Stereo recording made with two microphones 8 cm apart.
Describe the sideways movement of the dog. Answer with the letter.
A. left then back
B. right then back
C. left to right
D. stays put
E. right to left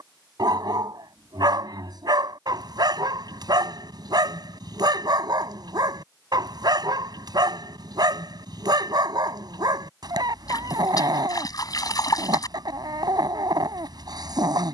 D.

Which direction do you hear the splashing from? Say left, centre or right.
left.